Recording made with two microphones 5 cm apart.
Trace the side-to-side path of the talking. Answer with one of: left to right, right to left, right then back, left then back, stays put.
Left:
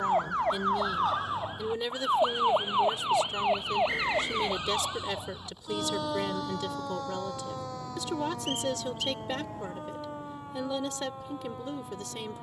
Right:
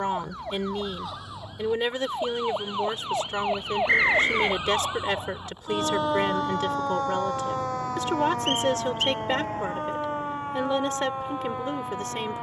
stays put.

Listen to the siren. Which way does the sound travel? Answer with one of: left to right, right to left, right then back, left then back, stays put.
left to right.